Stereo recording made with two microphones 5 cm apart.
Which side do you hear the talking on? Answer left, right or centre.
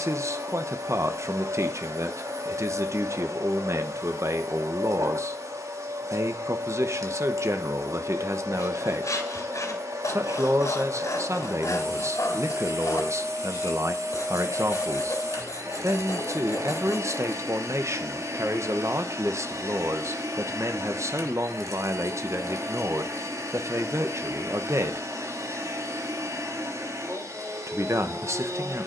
right.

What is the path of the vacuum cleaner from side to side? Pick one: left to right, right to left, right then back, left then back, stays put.
stays put.